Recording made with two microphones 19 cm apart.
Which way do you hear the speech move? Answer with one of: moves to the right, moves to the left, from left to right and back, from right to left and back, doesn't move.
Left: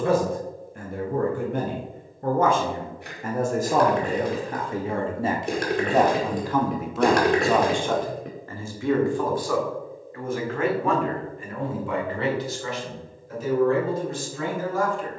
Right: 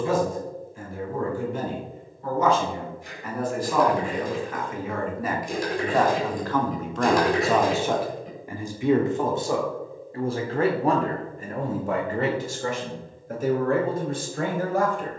moves to the right.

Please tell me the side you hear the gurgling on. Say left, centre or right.
left.